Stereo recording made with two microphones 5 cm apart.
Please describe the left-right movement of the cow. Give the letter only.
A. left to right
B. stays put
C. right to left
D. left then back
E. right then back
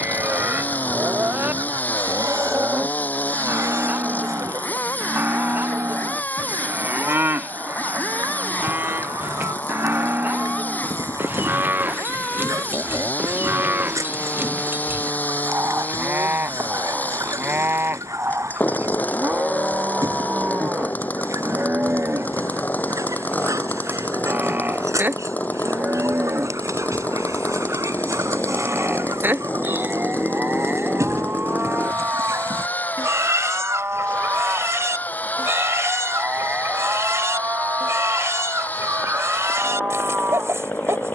B.